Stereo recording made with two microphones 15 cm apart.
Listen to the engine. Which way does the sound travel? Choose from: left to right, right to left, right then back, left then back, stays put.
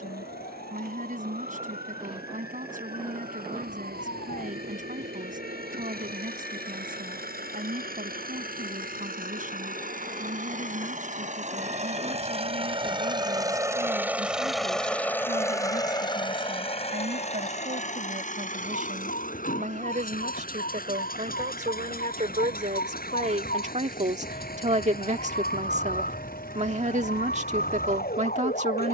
right to left.